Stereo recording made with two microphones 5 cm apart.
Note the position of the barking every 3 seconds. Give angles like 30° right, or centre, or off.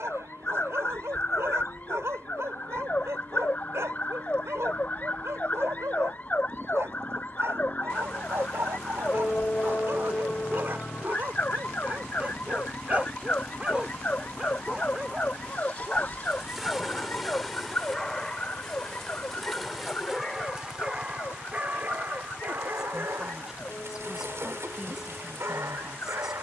70° right, 70° right, 70° right, 50° right, 30° right, centre, centre, 50° right, 70° right.